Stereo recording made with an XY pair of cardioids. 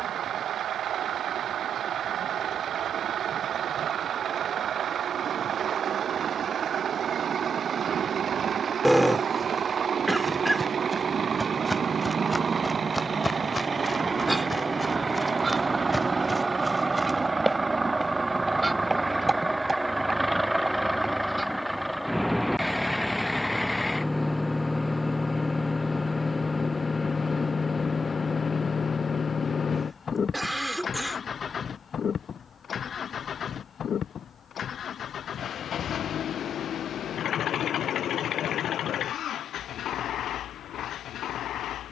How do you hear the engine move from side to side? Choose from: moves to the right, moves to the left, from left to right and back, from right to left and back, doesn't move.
moves to the left.